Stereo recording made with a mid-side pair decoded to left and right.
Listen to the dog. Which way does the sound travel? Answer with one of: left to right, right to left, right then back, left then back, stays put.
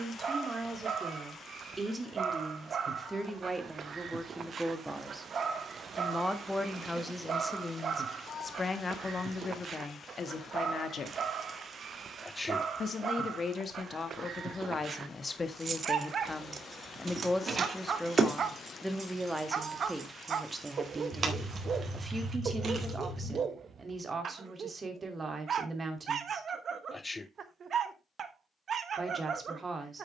stays put.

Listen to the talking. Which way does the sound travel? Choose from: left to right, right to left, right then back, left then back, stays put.
left then back.